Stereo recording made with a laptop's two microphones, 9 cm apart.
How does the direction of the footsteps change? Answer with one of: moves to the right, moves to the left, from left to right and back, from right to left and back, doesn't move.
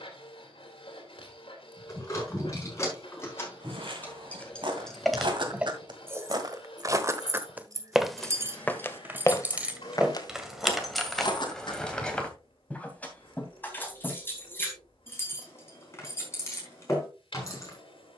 moves to the left.